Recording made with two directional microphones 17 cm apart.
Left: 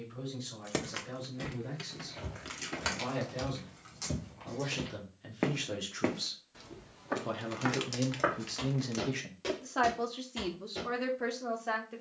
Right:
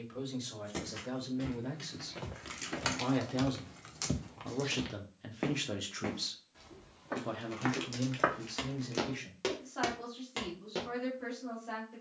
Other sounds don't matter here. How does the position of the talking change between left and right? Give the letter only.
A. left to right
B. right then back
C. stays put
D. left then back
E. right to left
E.